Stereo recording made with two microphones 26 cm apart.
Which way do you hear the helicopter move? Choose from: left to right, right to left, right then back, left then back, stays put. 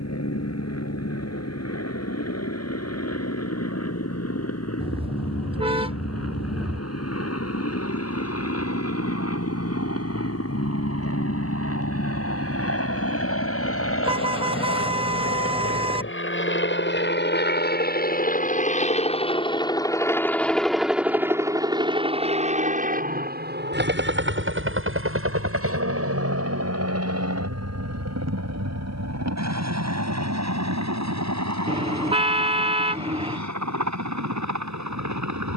left to right.